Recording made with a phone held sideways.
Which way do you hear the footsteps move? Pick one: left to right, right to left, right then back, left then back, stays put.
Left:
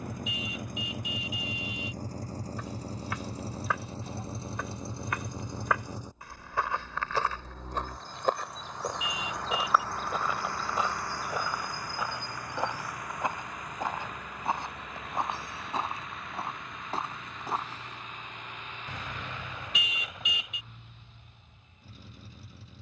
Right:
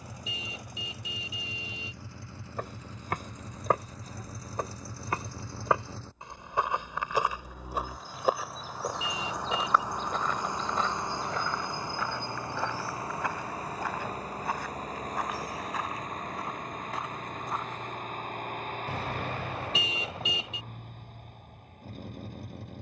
right to left.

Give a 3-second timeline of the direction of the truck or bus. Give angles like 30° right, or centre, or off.
40° left, 30° left, centre, 20° right, 30° right, 40° right, 50° right, 50° right.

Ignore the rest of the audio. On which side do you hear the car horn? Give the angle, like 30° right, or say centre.
30° right.